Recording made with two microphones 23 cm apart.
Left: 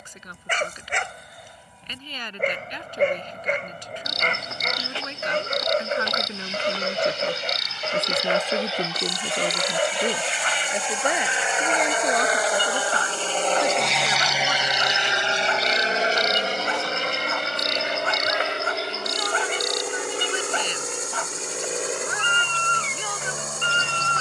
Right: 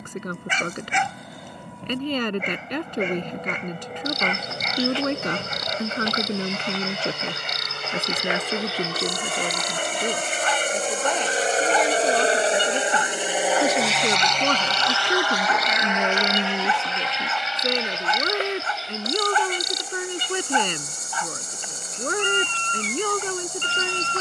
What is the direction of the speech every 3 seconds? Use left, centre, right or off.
right, right, right, centre, right, right, right, right.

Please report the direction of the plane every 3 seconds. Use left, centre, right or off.
right, right, right, right, centre, left, left, left.